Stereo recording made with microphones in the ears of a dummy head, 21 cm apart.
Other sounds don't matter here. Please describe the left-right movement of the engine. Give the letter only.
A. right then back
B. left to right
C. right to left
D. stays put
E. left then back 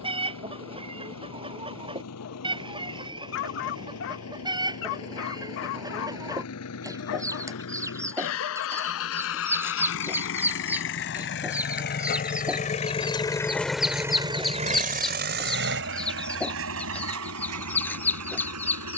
B.